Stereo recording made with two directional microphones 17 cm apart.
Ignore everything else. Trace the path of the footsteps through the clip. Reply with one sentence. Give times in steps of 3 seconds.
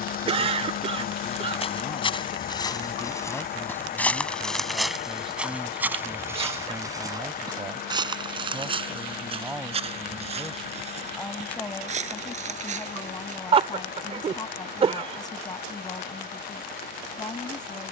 You can hear the footsteps on the left from 0 s, in the centre from 3 s, on the right from 6 s and not at all from 15 s.